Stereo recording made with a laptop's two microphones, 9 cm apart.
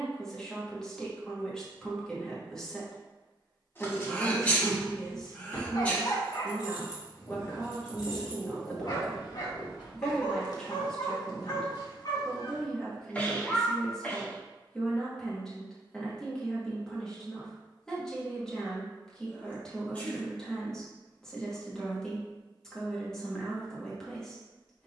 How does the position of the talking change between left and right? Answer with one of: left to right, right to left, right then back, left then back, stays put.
stays put.